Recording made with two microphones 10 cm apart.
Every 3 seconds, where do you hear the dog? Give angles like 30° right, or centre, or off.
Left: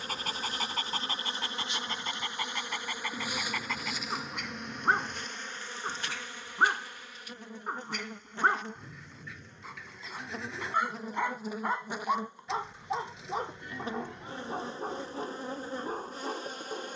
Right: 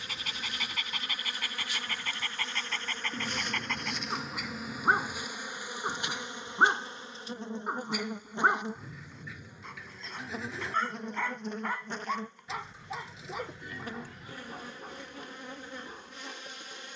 30° left, centre, 10° right, 10° left, 30° left, 50° left.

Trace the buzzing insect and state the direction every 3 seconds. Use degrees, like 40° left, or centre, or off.
20° left, centre, 20° right, centre, 20° left, 40° left.